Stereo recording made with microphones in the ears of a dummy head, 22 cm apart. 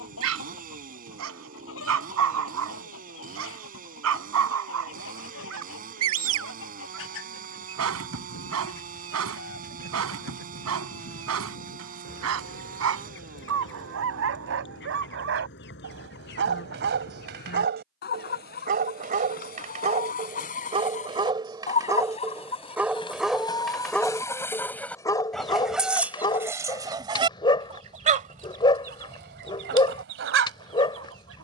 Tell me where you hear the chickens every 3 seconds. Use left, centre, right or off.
left, left, left, left, left, left, left, left, centre, right, right.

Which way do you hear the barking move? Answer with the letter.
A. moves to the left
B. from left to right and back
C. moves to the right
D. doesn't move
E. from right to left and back
A.